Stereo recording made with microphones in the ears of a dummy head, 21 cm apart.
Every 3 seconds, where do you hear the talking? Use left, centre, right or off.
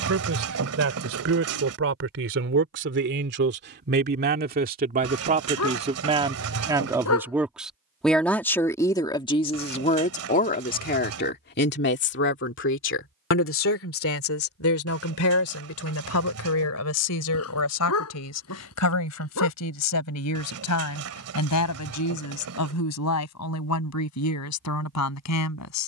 right, right, centre, left, left, left, left, left, left.